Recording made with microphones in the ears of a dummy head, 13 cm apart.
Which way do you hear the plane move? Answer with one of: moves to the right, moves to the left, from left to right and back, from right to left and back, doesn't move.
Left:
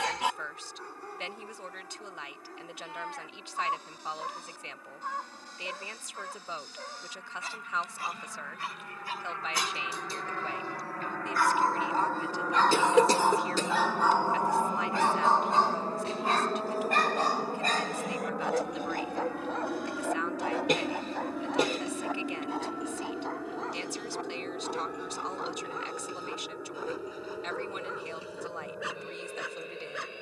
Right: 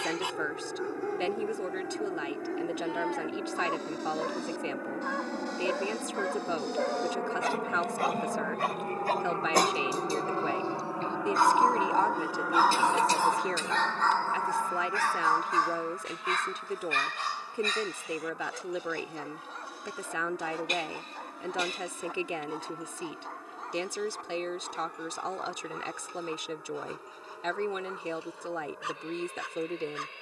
moves to the left.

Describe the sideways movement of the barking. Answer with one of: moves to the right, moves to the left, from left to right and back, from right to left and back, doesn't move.
moves to the left.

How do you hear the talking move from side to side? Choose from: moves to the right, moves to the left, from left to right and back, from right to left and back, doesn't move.
doesn't move.